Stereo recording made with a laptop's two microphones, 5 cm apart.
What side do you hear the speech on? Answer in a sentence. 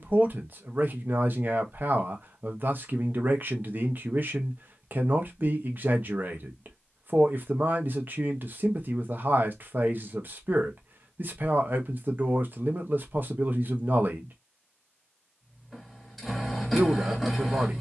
In this clip you hear the speech on the right.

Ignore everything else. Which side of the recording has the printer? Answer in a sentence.
You can hear the printer in the centre.